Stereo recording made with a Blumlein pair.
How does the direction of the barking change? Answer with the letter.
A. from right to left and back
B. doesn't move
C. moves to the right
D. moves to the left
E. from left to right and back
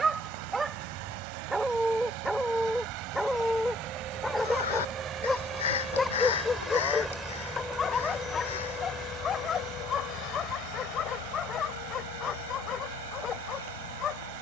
D.